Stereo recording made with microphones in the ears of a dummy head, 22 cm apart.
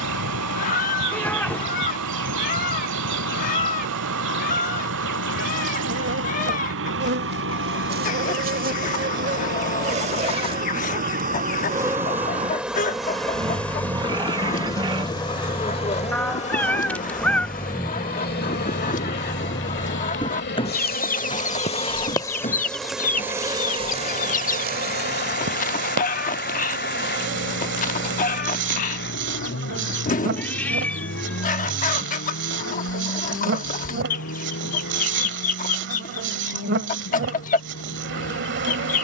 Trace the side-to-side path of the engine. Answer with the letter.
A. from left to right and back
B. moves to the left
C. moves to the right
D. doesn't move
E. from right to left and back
B.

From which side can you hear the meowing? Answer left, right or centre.
centre.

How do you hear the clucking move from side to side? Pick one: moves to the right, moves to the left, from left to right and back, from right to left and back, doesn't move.
doesn't move.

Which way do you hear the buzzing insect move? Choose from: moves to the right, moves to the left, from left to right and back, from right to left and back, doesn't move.
from right to left and back.